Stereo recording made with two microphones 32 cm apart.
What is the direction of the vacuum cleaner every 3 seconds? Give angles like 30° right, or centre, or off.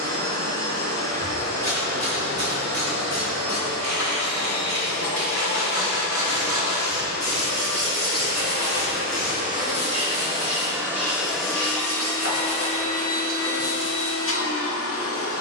50° right, 50° right, 40° right, 10° right, 30° left.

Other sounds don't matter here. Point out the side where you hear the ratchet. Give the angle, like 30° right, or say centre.
50° right.